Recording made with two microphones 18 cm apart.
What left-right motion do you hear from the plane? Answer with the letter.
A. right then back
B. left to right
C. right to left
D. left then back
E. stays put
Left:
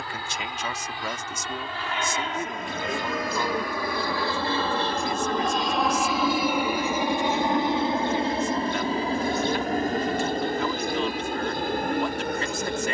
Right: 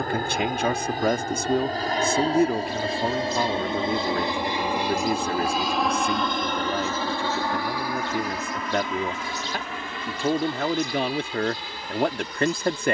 C.